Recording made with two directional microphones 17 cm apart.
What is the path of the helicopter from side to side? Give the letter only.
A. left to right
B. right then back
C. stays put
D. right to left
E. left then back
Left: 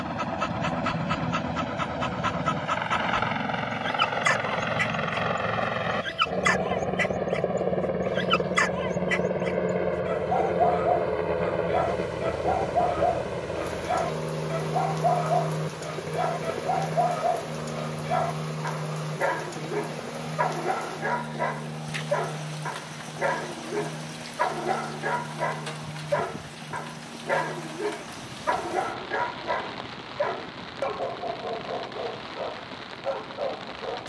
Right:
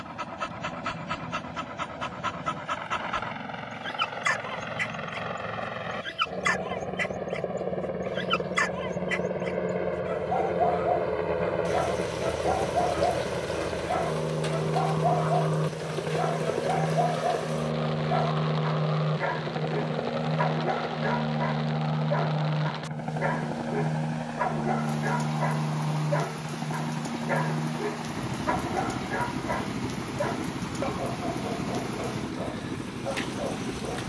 A.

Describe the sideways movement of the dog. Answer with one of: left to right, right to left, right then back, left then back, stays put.
stays put.